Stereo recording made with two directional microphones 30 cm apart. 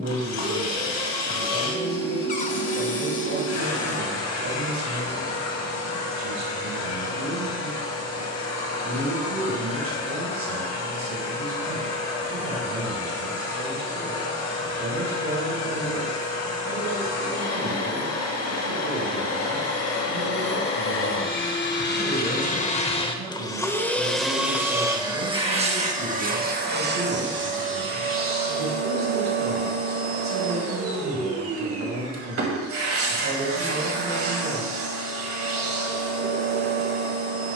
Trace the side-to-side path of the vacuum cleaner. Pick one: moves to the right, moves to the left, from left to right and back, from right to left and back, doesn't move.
moves to the right.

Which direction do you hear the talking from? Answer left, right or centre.
right.